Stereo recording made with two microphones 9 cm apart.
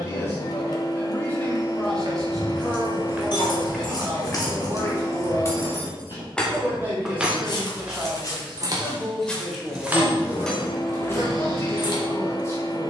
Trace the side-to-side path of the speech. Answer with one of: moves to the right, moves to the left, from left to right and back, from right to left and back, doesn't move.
from left to right and back.